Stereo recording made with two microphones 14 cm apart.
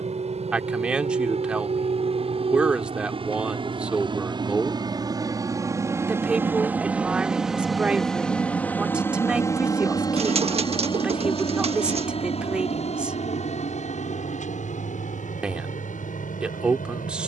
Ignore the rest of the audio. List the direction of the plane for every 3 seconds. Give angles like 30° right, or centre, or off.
50° right, 30° right, centre, 30° left, 50° left, 60° left.